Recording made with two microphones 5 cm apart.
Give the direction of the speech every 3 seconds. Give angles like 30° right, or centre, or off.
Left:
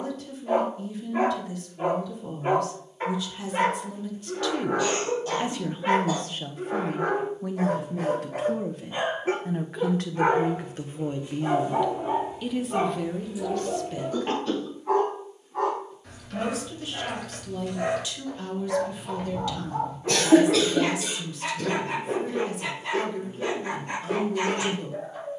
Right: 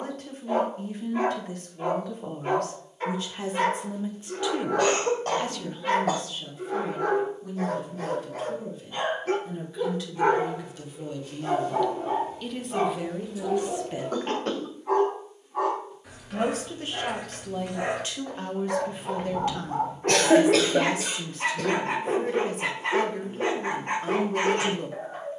50° right, 10° right, 60° left, 40° left, 10° right, 40° right, 40° right, 40° right, 40° right.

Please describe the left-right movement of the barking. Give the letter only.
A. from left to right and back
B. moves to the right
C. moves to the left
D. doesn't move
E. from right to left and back
B.